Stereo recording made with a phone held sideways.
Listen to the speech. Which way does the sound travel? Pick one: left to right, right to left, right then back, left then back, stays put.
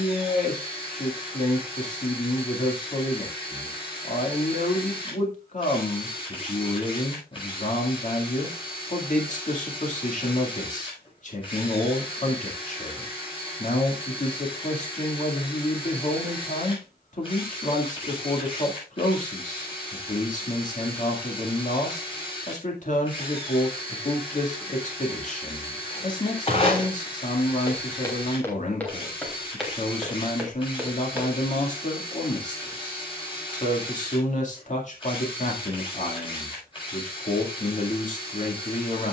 stays put.